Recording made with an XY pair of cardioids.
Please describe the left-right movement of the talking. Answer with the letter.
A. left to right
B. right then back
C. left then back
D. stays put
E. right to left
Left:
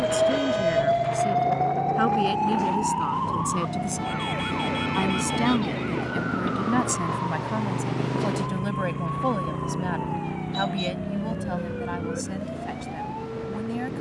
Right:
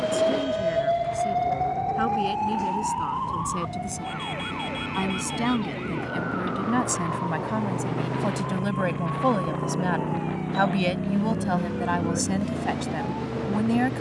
A.